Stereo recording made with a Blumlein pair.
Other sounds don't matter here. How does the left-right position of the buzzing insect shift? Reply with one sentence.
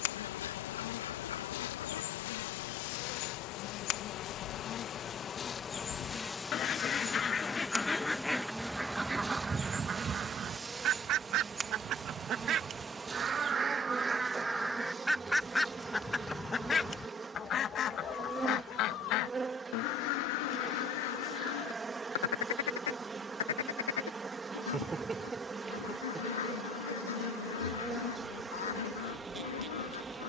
In this clip you hear the buzzing insect move to the right.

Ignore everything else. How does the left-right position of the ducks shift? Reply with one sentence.
In this clip you hear the ducks go right and come back.